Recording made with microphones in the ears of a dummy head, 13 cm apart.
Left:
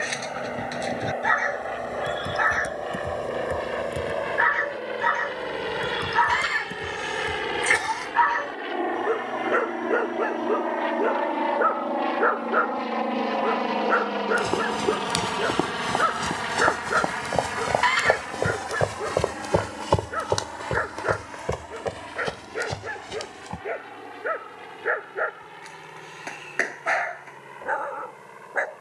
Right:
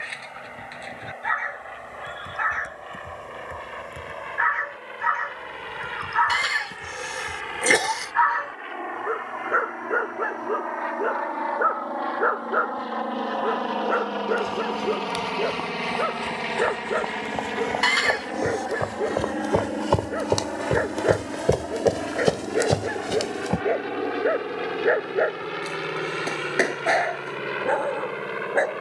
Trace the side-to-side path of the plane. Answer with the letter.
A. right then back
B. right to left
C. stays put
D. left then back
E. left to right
E.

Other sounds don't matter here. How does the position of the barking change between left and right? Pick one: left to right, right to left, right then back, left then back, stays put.
left to right.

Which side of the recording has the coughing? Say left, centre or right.
right.